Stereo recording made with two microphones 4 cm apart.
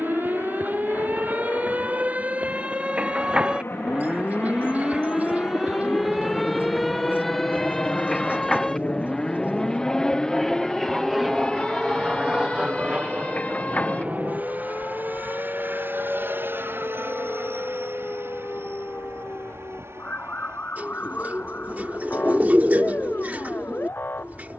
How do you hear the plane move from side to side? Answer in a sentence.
In this clip you hear the plane move to the right.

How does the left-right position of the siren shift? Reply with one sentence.
In this clip you hear the siren move from right to left.